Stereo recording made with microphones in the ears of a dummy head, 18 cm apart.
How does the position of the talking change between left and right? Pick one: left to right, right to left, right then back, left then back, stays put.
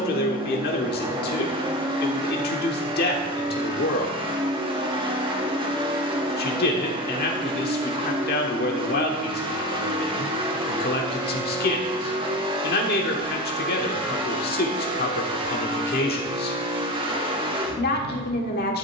stays put.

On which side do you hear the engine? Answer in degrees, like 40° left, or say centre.
30° right.